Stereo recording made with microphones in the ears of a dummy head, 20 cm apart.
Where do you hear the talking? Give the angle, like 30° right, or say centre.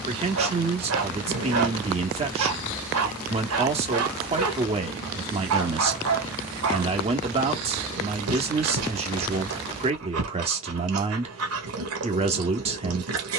30° right.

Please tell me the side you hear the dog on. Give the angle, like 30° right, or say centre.
90° right.